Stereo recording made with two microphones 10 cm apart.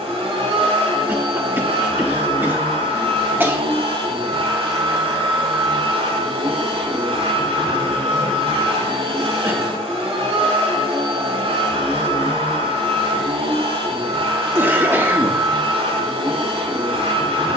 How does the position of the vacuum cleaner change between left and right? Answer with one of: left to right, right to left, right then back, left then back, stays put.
stays put.